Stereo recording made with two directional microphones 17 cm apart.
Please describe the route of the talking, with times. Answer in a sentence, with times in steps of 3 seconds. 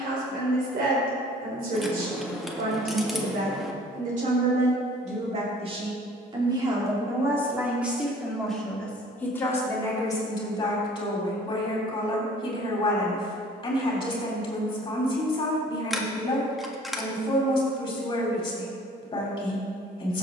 You can hear the talking on the right from 0 s, in the centre from 6 s and on the left from 9 s.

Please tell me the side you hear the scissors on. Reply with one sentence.
You can hear the scissors in the centre.